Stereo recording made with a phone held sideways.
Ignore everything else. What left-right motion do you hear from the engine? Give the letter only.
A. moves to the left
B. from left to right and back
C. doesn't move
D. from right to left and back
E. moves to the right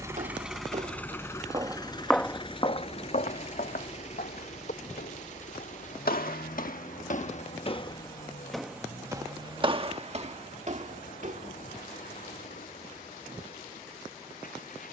A.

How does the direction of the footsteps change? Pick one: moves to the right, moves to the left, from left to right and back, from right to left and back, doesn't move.
from right to left and back.